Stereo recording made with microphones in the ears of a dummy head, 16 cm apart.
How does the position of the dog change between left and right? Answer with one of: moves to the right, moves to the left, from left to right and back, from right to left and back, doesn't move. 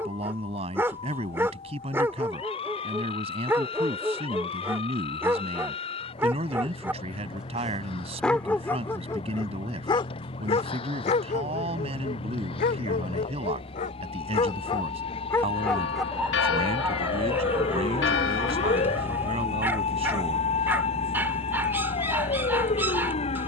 from right to left and back.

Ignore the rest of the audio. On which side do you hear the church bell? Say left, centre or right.
left.